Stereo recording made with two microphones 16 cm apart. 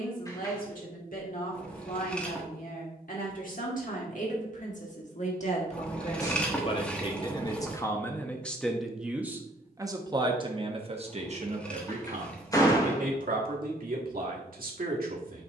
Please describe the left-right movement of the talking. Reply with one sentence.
In this clip you hear the talking go from the left side to the right.